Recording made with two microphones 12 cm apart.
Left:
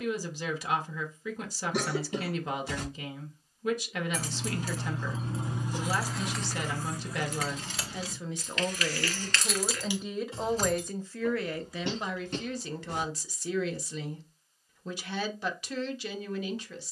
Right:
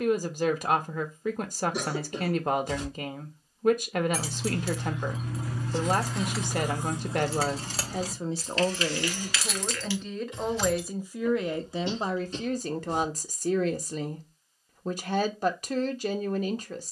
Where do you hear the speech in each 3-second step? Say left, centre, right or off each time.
right, right, right, centre, right, right.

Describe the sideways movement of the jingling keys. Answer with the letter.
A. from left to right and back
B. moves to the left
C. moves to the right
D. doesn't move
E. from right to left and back
A.